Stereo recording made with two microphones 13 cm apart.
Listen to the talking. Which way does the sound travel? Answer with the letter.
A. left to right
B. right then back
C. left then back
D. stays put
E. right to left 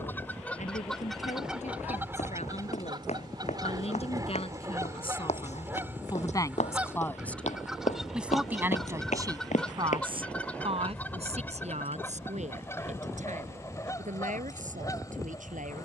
A.